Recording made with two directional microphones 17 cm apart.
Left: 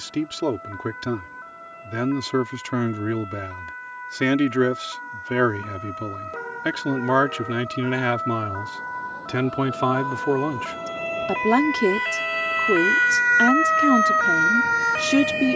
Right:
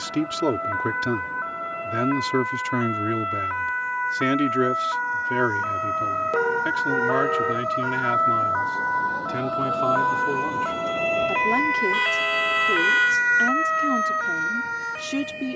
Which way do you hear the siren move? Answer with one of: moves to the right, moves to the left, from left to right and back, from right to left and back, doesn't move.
moves to the left.